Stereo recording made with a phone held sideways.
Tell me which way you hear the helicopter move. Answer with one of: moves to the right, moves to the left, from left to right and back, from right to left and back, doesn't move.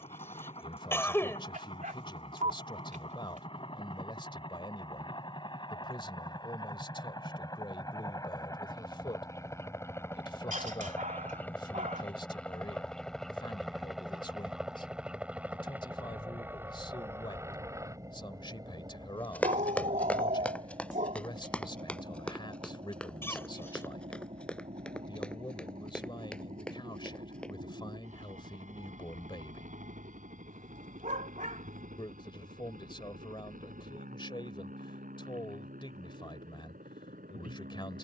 moves to the right.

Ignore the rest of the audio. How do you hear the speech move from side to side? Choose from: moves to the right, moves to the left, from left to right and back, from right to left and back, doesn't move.
doesn't move.